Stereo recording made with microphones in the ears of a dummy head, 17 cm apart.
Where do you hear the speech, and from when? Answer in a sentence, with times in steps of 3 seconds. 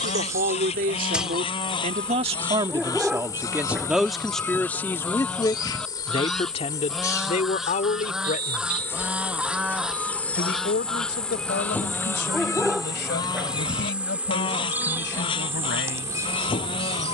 You can hear the speech on the right from 0 s, in the centre from 3 s and on the left from 6 s.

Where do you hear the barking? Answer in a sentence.
You can hear the barking in the centre.